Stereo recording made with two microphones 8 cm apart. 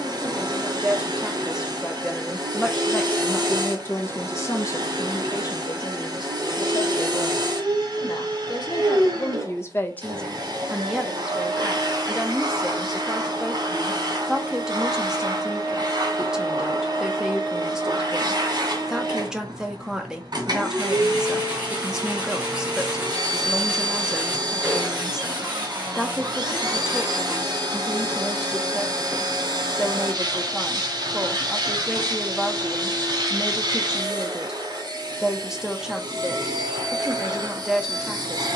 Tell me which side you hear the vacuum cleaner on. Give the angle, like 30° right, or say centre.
60° right.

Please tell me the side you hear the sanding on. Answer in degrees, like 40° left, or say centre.
20° right.